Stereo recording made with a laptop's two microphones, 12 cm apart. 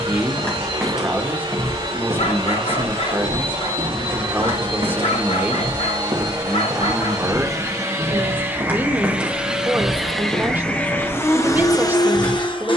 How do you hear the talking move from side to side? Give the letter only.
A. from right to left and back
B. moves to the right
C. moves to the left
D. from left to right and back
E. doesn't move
E.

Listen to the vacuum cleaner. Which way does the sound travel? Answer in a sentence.
You can hear the vacuum cleaner travel towards the left.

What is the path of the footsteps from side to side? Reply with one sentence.
In this clip you hear the footsteps move from left to right and back again.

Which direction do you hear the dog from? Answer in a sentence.
You can hear the dog on the left.